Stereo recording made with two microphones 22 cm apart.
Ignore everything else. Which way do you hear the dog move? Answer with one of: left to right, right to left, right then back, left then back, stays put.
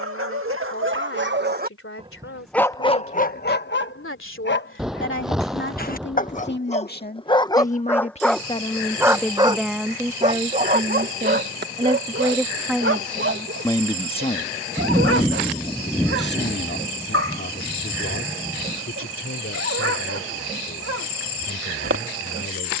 left then back.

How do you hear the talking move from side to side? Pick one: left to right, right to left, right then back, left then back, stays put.
right then back.